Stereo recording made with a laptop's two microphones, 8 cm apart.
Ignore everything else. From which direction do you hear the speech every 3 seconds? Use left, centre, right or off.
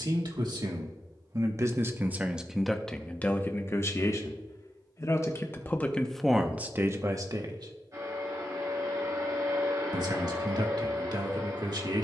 right, left, right, right.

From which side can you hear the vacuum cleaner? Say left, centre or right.
right.